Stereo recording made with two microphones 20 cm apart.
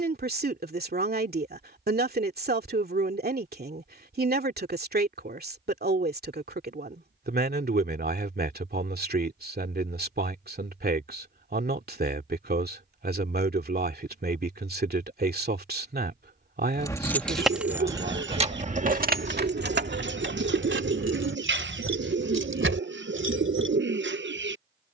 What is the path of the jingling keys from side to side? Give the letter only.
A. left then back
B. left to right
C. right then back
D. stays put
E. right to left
B.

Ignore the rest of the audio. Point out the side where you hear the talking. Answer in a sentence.
In this clip you hear the talking on the right.